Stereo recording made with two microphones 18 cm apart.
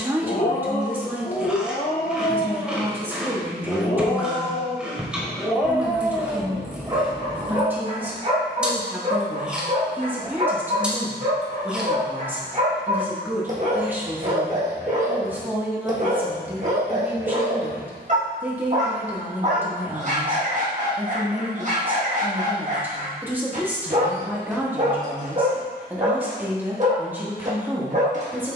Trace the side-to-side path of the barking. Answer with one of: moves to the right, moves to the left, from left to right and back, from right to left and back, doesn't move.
moves to the right.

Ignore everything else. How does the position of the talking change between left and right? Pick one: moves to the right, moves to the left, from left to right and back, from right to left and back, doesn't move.
doesn't move.